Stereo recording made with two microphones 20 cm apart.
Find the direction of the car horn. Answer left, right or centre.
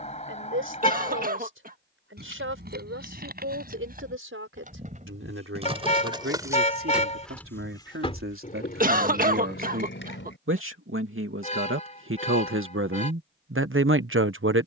left.